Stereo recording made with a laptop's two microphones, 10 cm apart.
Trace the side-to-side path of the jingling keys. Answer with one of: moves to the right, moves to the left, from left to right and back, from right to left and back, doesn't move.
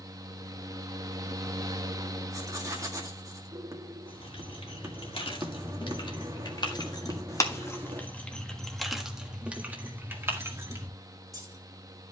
moves to the right.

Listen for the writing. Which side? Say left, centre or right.
right.